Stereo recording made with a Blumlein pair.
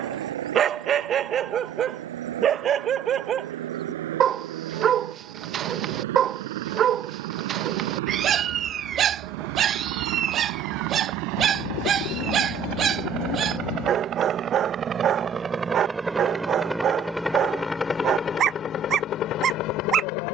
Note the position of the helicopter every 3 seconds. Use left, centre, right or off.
right, right, right, right, right, centre, left.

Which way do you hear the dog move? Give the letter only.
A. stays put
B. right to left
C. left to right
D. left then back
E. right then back
A.